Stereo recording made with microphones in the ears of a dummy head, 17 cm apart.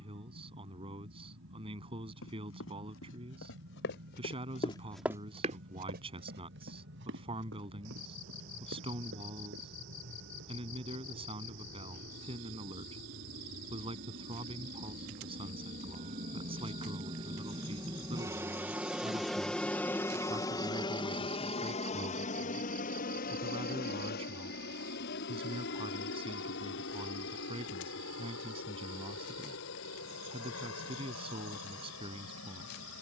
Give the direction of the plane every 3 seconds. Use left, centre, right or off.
right, right, right, right, right, right, centre, left, left, left, left.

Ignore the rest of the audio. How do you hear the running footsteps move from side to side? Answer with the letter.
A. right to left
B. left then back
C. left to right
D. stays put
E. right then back
C.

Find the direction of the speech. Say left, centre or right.
right.